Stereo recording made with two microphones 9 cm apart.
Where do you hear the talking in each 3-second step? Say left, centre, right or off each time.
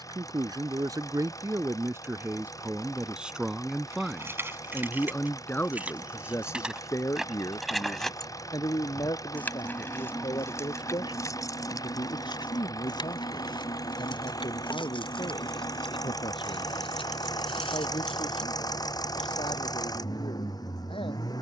right, centre, left, left, left, left, left.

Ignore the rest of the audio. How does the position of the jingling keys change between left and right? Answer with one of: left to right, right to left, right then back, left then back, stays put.
right to left.